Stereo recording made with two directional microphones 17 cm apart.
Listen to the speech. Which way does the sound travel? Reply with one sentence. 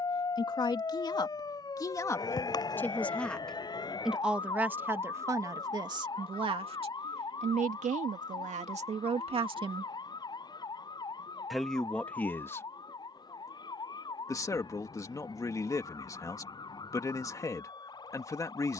In this clip you hear the speech move from left to right and back again.